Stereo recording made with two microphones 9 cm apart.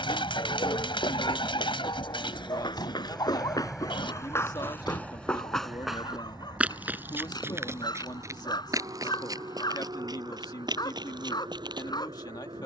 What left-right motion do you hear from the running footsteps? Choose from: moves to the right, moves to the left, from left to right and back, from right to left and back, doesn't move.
moves to the right.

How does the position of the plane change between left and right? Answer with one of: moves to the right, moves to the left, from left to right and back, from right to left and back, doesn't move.
moves to the right.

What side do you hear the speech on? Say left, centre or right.
left.